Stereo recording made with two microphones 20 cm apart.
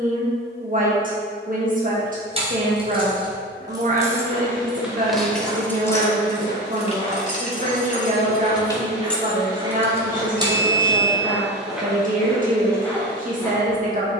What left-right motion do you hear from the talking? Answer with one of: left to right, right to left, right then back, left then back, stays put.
stays put.